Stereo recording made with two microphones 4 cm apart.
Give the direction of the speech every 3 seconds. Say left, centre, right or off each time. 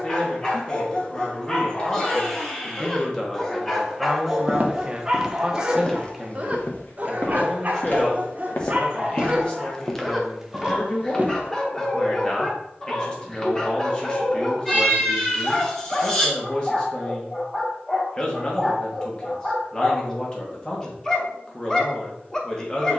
left, centre, centre, left, left, left, left, left.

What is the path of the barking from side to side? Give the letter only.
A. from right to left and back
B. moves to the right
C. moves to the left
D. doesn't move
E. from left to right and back
E.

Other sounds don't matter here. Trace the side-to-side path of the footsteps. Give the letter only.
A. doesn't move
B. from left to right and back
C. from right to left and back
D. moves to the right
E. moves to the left
C.